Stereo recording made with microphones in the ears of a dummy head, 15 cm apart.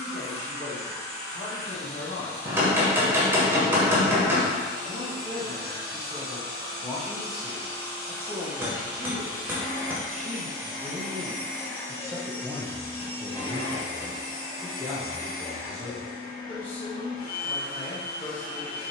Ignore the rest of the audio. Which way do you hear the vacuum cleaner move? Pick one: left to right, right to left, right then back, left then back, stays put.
right to left.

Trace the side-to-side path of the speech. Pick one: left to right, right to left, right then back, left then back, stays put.
right then back.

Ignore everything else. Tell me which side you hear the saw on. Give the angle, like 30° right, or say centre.
centre.